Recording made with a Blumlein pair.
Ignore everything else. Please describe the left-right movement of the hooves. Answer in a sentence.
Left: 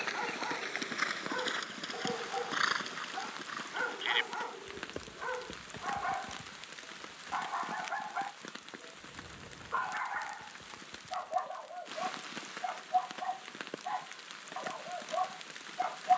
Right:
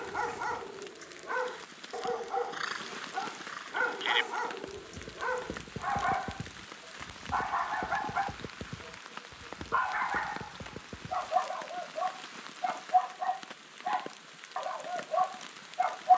You can hear the hooves move from left to right.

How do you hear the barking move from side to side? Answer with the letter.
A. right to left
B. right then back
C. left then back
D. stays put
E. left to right
D.